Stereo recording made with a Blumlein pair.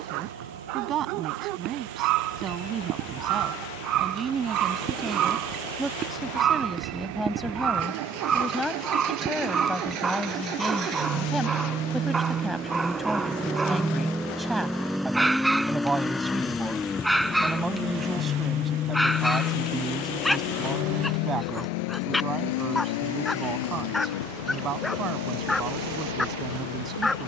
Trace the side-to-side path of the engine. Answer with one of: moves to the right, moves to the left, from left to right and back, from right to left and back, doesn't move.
moves to the left.